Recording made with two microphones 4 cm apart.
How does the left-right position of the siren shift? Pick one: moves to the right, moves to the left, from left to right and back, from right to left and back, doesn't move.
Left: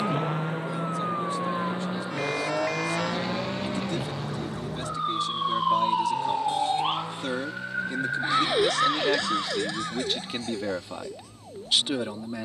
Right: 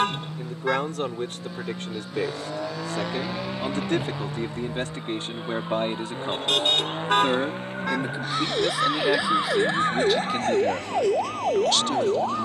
moves to the right.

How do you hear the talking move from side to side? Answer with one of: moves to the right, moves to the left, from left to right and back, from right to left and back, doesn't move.
moves to the left.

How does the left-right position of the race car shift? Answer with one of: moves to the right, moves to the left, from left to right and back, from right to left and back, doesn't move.
moves to the right.